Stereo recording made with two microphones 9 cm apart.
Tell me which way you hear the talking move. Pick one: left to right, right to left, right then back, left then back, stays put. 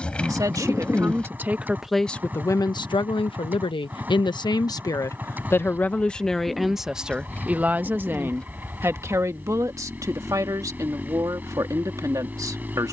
left then back.